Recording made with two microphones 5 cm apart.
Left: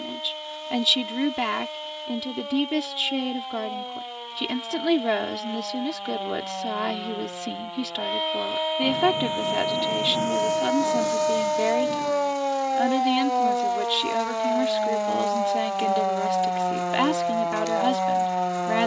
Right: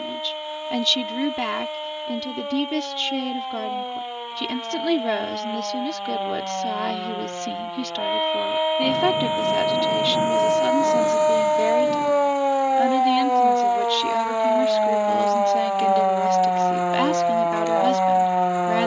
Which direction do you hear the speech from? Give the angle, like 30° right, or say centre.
centre.